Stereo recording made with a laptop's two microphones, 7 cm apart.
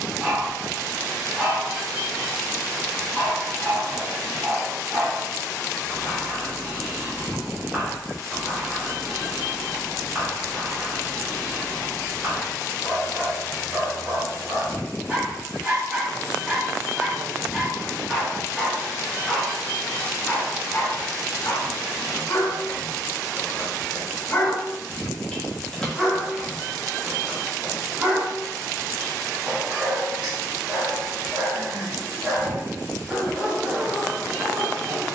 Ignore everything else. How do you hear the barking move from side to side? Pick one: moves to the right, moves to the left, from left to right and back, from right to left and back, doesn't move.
from right to left and back.